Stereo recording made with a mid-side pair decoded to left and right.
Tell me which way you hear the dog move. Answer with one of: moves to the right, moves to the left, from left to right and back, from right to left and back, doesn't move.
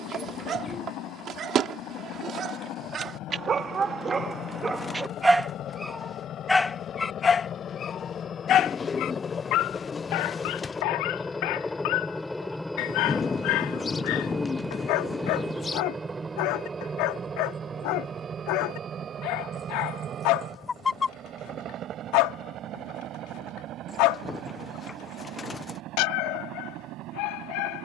moves to the left.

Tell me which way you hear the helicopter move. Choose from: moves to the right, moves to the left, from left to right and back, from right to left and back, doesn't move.
moves to the right.